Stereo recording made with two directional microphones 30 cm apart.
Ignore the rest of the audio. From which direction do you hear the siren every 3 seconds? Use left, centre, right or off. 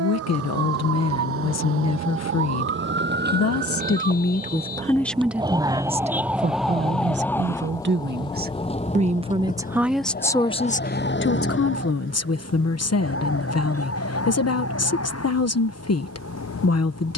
right, right, centre, left, left, left.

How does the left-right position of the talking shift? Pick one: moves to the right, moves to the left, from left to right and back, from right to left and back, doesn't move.
from left to right and back.